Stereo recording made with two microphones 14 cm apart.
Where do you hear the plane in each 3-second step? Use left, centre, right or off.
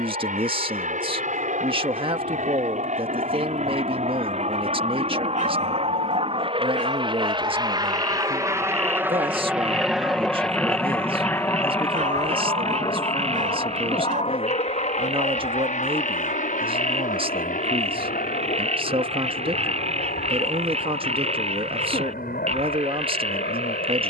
right, right, right, centre, left, left, left, left.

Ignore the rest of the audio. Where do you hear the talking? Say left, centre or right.
right.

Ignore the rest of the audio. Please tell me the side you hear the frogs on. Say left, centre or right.
right.